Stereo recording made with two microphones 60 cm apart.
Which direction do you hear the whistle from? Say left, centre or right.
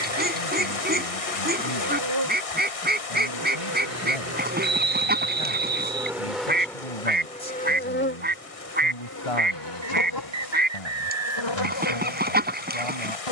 right.